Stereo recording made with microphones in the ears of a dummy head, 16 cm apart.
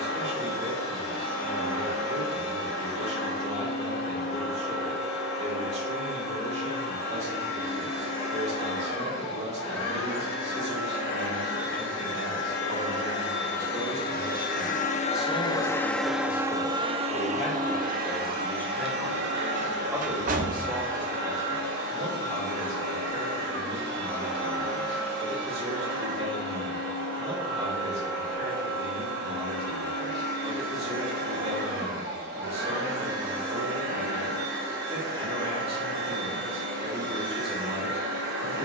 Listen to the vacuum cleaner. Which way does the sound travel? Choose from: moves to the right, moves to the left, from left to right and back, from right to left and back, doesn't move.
moves to the right.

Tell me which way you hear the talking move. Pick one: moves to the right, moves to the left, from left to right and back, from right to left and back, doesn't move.
from right to left and back.